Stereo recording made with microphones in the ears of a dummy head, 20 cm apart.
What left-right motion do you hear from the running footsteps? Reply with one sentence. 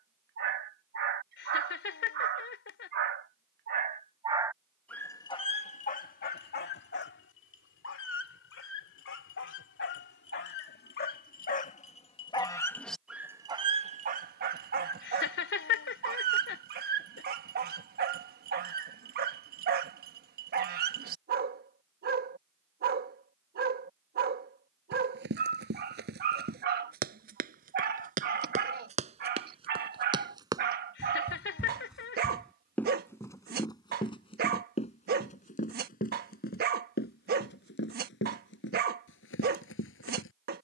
In this clip you hear the running footsteps move from right to left.